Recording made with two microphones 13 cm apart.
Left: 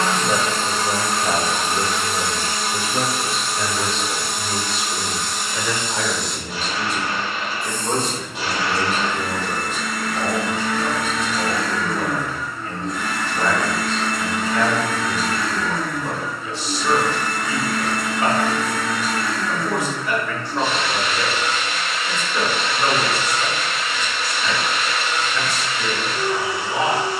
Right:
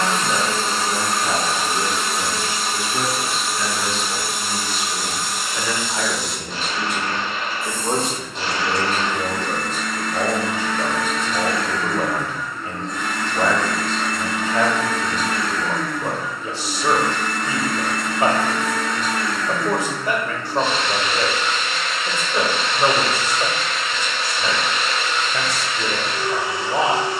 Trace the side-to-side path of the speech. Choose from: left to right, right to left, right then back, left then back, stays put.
left to right.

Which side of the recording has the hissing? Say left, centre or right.
centre.